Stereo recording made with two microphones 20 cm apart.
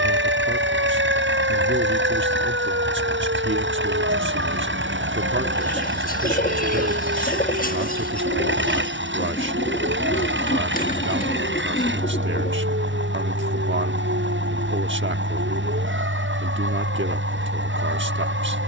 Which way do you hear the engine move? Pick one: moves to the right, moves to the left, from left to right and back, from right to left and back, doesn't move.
doesn't move.